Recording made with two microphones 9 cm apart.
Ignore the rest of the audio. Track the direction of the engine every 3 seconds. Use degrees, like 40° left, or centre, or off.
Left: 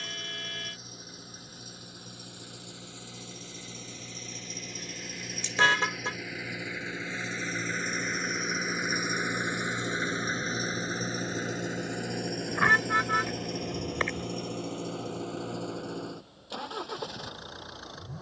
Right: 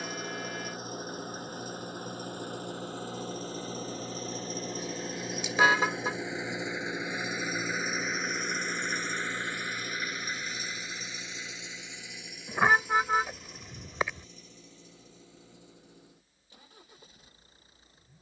50° right, 40° right, 10° right, 30° left, 60° left, 80° left.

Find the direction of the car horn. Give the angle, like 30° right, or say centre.
10° right.